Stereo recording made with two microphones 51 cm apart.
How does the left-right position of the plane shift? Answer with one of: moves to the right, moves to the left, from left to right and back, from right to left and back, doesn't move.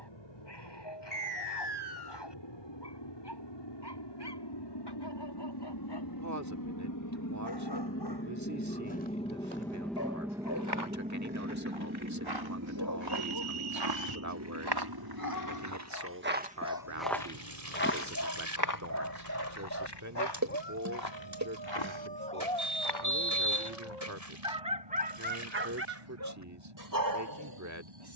moves to the right.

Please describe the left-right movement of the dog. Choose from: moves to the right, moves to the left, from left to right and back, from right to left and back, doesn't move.
moves to the right.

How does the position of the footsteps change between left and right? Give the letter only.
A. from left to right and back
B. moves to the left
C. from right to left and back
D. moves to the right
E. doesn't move
B.